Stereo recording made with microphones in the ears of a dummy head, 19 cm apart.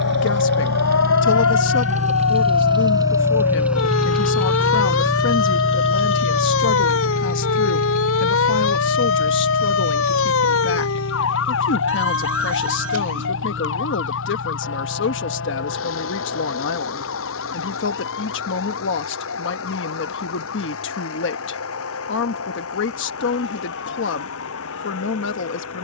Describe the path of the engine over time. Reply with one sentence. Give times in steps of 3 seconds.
In this clip you hear the engine on the right from 0 s, in the centre from 3 s and on the left from 6 s.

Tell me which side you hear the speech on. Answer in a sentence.
In this clip you hear the speech on the left.